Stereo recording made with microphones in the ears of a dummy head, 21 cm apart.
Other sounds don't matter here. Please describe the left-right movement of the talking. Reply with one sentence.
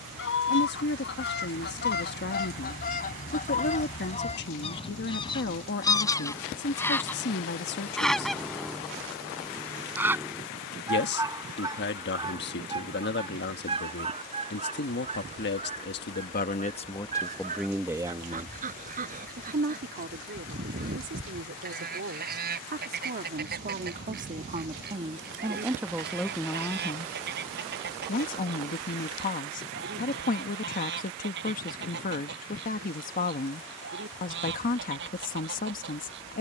You can hear the talking go right and come back.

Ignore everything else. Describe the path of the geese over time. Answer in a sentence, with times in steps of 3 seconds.
In this clip you hear the geese on the left from 0 s, in the centre from 6 s and on the right from 12 s.